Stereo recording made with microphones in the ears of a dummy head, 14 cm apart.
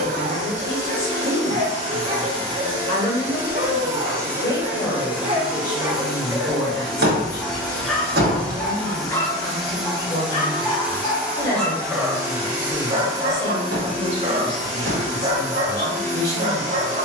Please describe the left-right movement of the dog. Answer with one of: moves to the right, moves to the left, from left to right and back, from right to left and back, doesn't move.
from right to left and back.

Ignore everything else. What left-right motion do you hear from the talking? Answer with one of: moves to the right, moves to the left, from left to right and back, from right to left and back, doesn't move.
doesn't move.